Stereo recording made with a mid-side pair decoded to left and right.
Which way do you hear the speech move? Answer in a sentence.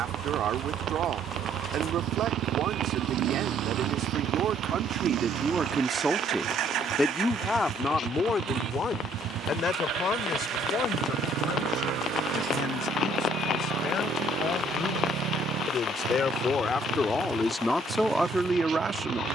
You can hear the speech move from right to left and back again.